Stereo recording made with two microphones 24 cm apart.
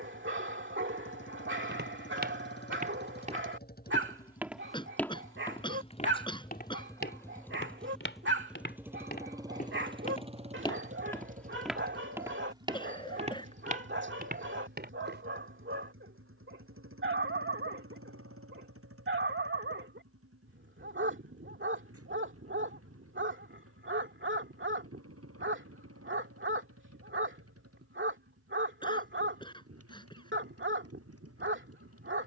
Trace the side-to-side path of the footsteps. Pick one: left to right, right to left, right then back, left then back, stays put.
left then back.